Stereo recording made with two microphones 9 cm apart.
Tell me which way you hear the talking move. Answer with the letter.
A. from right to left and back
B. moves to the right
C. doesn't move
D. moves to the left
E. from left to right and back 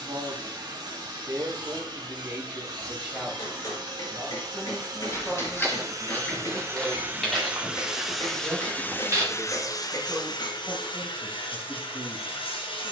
A.